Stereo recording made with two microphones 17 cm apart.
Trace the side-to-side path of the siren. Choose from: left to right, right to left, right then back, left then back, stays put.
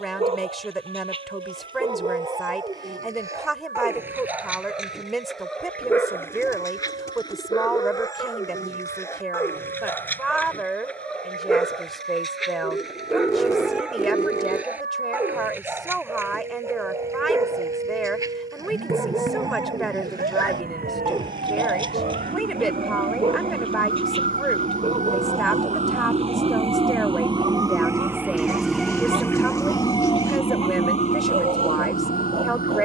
right to left.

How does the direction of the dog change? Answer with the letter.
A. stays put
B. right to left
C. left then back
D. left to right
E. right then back
C.